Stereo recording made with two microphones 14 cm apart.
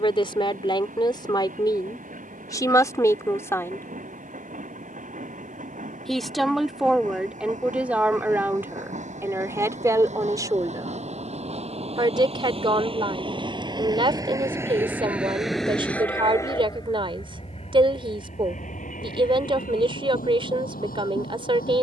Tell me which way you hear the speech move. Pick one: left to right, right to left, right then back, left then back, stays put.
left to right.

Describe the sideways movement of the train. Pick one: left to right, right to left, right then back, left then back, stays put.
right to left.